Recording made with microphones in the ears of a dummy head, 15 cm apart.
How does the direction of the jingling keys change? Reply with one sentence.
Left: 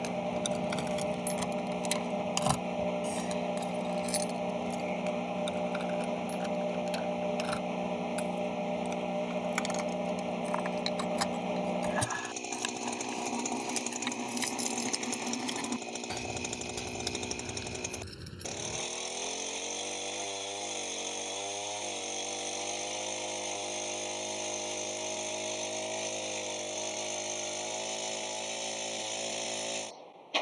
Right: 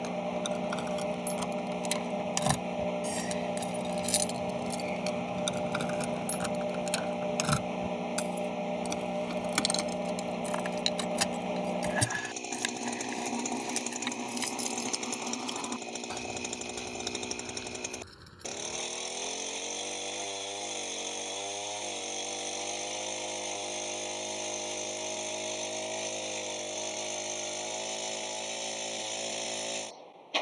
You can hear the jingling keys go right and come back.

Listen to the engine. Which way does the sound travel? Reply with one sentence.
In this clip you hear the engine stay in one place.